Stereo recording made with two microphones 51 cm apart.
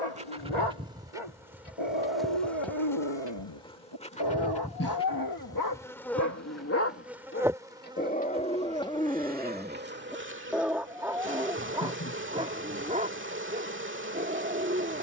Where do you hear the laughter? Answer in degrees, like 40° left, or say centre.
30° left.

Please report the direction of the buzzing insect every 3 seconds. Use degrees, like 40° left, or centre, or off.
centre, 10° left, 10° right, 20° right, 20° right.